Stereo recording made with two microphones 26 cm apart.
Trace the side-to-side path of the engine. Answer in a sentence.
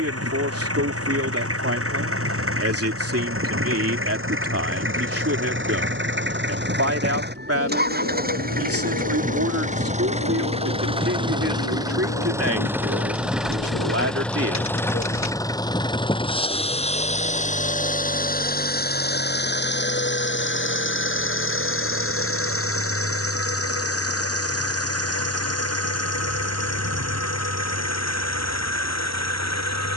In this clip you hear the engine move from right to left.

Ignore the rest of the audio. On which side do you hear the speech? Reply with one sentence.
You can hear the speech on the right.